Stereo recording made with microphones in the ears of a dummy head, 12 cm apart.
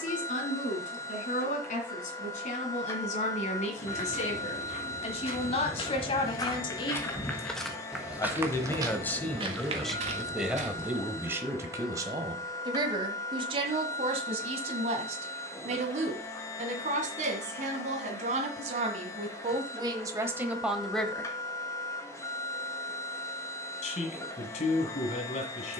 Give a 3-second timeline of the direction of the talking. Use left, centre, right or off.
left, left, left, centre, right, right, right, left, left.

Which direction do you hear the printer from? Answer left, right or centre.
left.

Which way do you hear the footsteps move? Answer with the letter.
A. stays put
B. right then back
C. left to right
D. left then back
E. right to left
C.